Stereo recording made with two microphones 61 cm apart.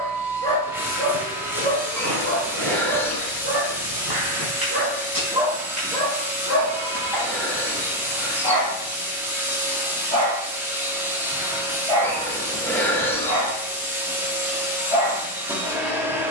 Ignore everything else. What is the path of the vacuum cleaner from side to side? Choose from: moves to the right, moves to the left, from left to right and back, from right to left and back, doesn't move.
doesn't move.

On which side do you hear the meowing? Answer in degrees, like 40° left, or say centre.
centre.